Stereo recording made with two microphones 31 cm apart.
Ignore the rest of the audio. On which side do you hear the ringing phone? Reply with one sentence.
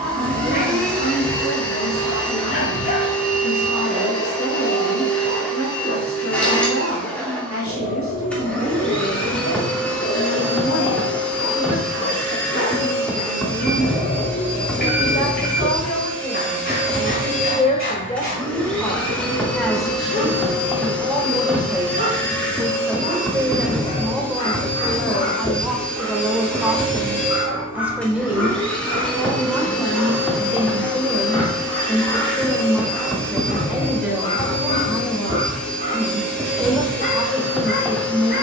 In this clip you hear the ringing phone on the left.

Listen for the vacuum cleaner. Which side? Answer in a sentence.
In this clip you hear the vacuum cleaner in the centre.